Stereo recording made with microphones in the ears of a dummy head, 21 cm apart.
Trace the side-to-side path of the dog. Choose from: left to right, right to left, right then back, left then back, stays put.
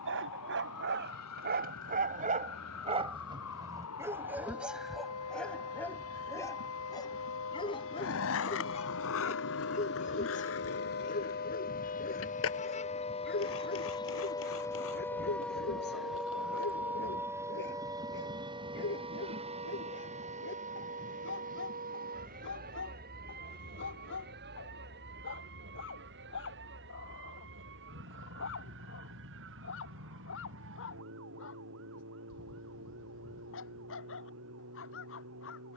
right to left.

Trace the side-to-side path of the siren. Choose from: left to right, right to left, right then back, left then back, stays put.
left to right.